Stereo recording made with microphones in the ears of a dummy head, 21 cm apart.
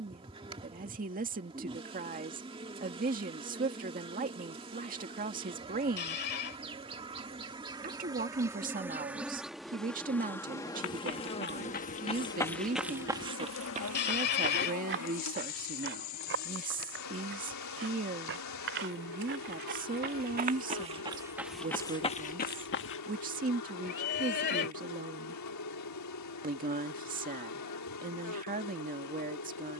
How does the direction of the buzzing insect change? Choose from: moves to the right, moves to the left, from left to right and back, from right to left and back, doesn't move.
moves to the left.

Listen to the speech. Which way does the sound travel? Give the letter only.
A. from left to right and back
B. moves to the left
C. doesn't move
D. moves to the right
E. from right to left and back
C.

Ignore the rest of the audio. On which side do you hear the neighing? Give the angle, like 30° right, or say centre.
50° left.